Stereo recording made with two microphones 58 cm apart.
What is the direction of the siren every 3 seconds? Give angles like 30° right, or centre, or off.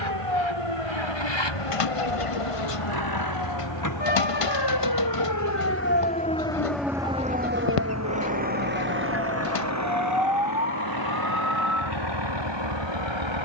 70° left, 40° left, 10° right, 50° right, 70° right.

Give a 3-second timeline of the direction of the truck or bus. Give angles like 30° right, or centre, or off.
50° left, 30° left, centre, 30° right, 50° right.